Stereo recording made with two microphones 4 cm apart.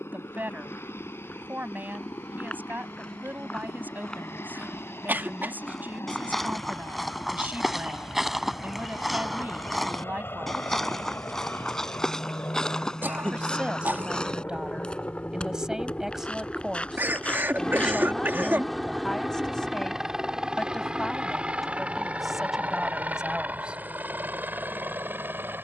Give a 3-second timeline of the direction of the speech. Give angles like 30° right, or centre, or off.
40° right, 40° right, 40° right, 40° right, 20° right, 10° right, 10° left, 10° right, off.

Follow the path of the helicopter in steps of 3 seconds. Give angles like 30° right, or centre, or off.
70° left, 70° left, 60° left, 60° left, 40° left, 20° left, 10° right, 30° right, 40° right.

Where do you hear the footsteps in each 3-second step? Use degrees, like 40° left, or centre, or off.
20° left, 10° left, centre, 10° left, 20° left, 20° left, off, off, off.